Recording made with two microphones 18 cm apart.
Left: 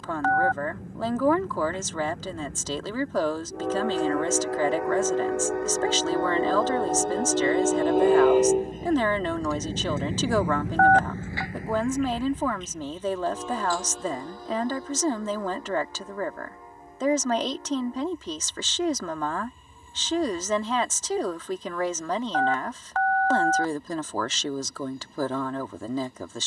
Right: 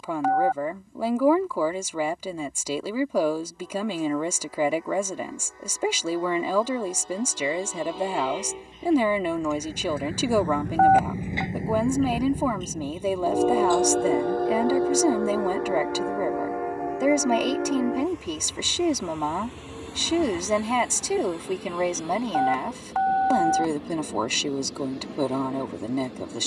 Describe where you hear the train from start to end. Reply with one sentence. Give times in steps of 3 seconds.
You can hear the train on the left from 0 s, in the centre from 9 s and on the right from 12 s.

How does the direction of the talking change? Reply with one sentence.
In this clip you hear the talking stay put.